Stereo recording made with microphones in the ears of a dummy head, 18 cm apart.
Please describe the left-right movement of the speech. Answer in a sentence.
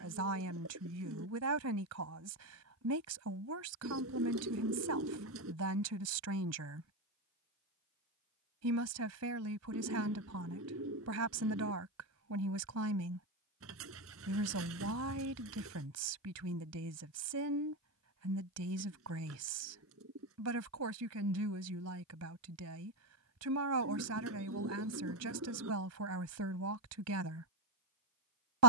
You can hear the speech stay put.